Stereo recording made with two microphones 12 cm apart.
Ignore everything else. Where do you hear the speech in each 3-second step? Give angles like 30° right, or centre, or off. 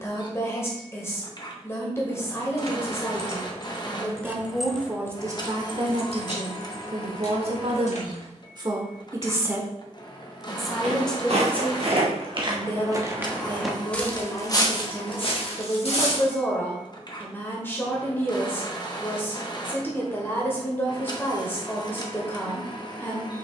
20° left, 10° right, 50° right, 10° right, 20° left, 20° left, 20° left, 20° left.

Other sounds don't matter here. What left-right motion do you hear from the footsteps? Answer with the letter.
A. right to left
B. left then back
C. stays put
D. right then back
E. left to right
A.